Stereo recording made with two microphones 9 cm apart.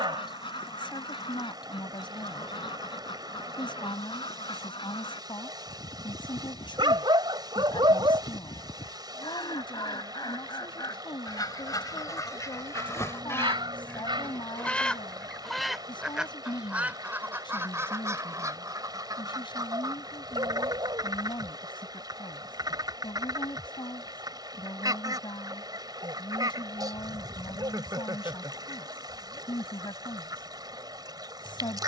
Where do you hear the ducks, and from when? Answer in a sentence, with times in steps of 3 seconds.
You can hear the ducks on the left from 0 s, in the centre from 15 s and on the right from 18 s.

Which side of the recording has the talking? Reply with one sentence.
In this clip you hear the talking on the left.